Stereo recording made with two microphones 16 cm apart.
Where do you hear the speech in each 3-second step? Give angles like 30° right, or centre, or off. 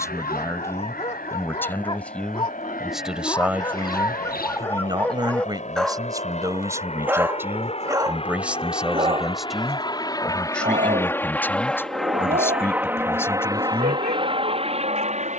10° left, 20° right, 10° right, 10° left, 10° left.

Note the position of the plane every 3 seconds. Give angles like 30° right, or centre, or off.
60° left, 50° left, 40° left, 20° left, 20° right.